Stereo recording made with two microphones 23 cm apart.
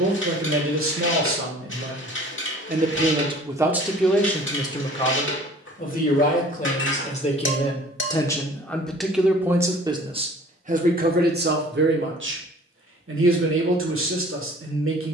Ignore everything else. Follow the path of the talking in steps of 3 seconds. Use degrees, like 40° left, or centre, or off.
60° right, 10° left, 20° left, 30° right, 60° right.